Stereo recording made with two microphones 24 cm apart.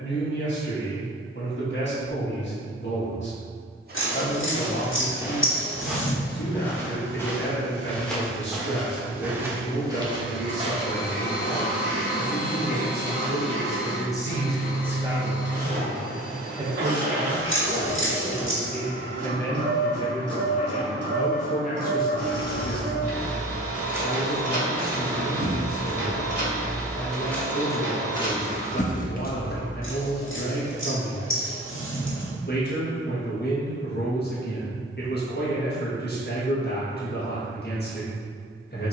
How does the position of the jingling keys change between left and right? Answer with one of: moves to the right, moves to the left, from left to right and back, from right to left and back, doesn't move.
from left to right and back.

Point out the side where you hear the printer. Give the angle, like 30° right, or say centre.
50° right.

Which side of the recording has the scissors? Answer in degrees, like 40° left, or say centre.
60° left.